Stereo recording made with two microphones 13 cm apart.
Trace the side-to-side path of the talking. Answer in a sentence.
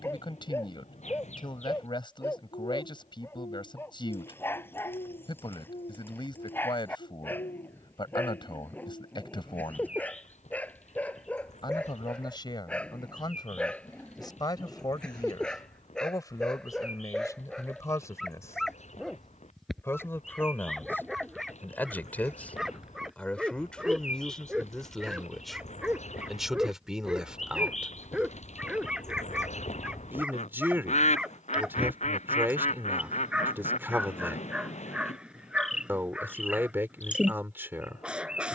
In this clip you hear the talking move to the right.